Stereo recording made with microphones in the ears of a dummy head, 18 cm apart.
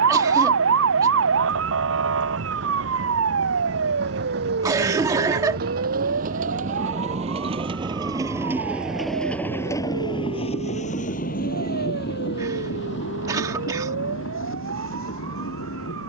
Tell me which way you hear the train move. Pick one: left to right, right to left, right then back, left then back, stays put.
right to left.